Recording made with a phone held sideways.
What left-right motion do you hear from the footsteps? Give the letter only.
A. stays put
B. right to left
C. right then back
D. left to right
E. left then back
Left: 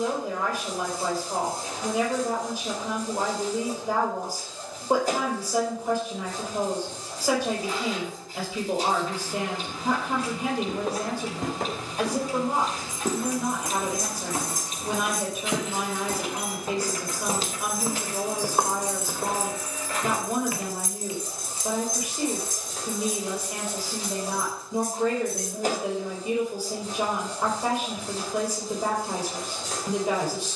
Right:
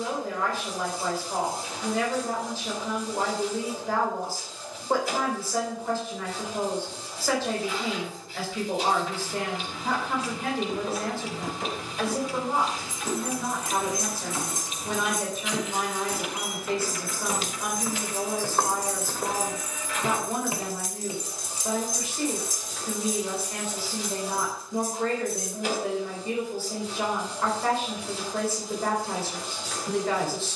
D.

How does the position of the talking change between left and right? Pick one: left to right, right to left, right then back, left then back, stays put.
stays put.